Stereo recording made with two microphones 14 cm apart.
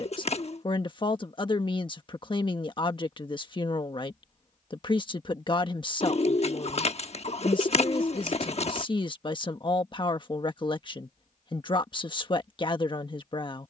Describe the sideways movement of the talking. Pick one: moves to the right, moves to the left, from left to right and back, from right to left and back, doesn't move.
doesn't move.